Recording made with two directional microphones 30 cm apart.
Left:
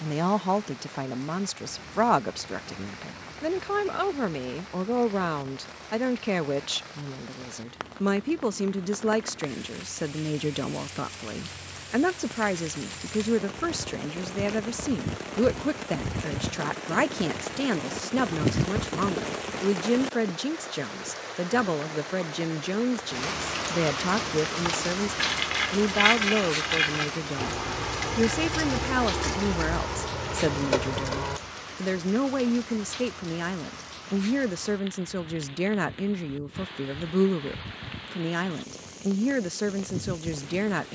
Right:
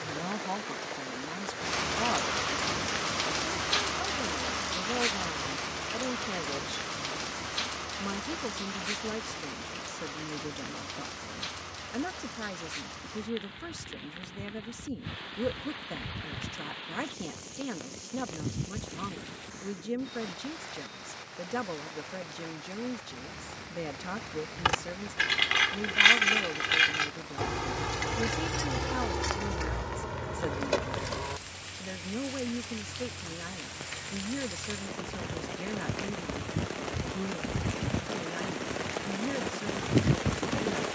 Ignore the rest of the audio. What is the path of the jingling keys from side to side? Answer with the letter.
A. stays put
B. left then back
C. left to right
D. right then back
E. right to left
E.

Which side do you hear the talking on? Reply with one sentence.
You can hear the talking on the left.